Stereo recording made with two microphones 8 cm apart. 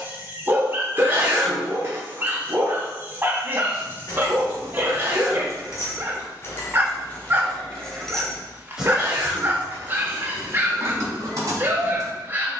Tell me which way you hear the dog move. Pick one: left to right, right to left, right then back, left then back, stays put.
stays put.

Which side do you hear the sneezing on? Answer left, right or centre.
right.